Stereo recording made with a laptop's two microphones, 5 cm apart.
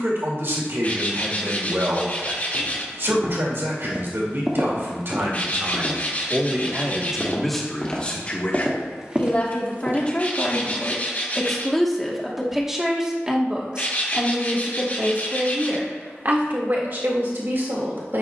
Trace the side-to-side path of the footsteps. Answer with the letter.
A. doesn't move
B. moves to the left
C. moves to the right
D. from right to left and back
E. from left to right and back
D.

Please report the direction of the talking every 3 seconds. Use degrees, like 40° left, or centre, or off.
60° right, 60° right, centre, 20° left, 20° right, 50° right.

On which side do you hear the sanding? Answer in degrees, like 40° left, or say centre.
30° left.